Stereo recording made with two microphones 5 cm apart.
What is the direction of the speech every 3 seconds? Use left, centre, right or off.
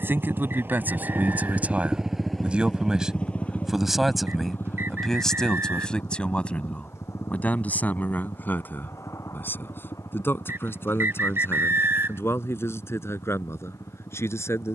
right, centre, left, left, left.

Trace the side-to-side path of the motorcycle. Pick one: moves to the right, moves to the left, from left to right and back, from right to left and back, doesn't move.
moves to the left.